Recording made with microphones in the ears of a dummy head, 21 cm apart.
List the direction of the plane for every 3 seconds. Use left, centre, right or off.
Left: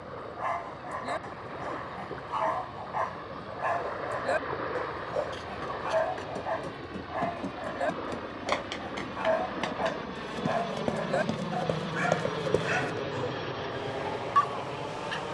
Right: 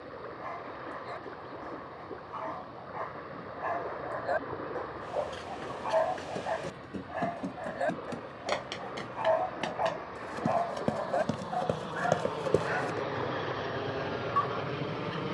left, left, left, left, centre.